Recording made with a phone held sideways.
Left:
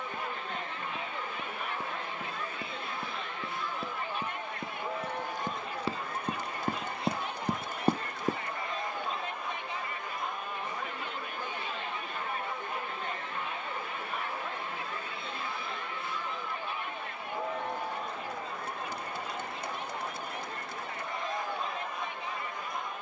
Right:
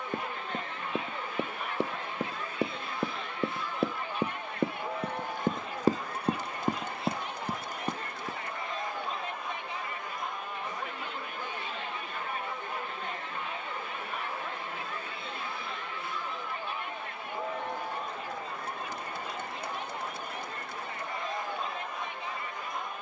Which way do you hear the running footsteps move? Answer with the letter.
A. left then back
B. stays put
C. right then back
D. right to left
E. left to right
D.